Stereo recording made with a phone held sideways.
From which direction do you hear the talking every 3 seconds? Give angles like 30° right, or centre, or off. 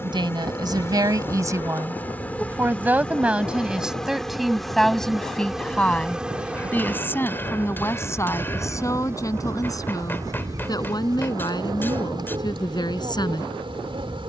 30° right, centre, 20° left, 30° left, 30° left.